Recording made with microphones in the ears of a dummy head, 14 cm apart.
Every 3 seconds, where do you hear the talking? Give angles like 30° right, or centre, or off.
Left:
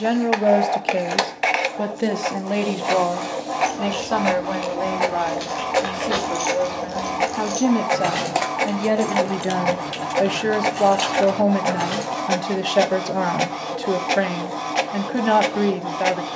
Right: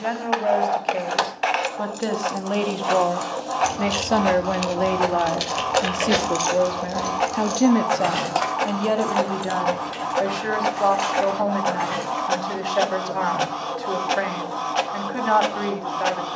30° left, 20° right, 10° right, 30° left, 40° left, 40° left.